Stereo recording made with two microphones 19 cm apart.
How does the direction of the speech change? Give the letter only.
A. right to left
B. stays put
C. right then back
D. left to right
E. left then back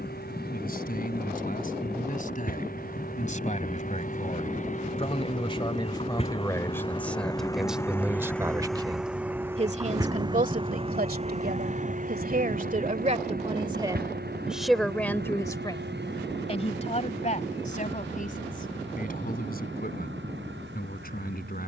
C.